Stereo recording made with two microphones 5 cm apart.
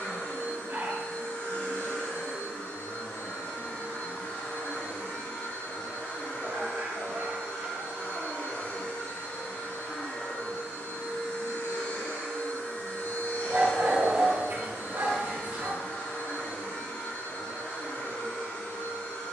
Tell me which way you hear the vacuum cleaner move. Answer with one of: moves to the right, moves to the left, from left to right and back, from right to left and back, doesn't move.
doesn't move.